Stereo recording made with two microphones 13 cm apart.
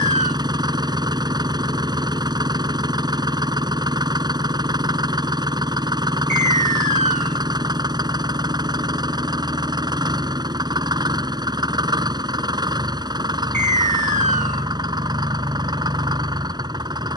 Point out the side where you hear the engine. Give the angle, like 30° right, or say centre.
30° right.